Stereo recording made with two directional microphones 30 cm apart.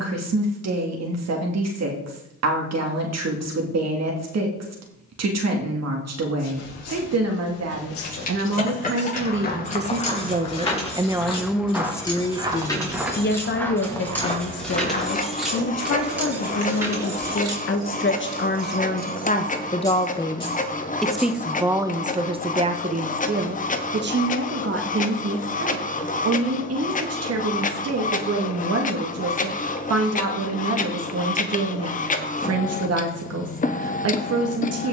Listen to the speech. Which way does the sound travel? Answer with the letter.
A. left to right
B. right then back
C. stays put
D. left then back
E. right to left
D.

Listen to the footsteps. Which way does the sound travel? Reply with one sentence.
In this clip you hear the footsteps move from left to right and back again.